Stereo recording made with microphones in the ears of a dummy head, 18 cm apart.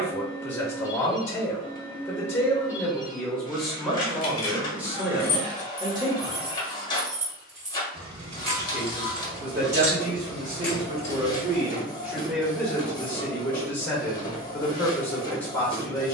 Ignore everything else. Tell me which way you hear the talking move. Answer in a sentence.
You can hear the talking go right and come back.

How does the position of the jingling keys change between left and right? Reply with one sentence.
In this clip you hear the jingling keys move from left to right and back again.